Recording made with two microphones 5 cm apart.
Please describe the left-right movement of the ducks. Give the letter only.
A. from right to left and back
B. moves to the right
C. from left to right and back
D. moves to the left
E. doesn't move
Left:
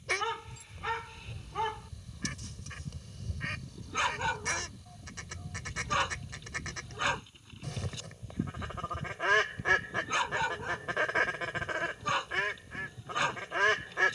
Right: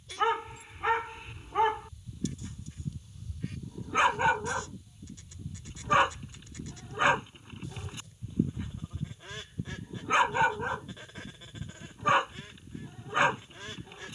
E.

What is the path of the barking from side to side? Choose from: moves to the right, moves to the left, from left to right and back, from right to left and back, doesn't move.
doesn't move.